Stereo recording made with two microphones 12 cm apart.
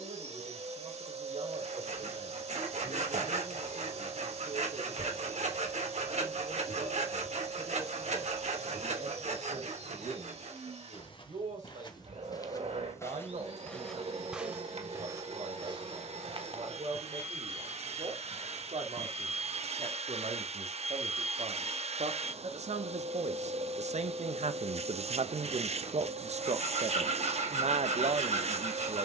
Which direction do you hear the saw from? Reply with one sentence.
You can hear the saw on the right.